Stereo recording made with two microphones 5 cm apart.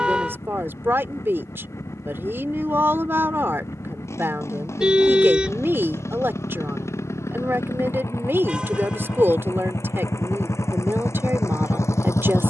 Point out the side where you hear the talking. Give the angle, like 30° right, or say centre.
50° right.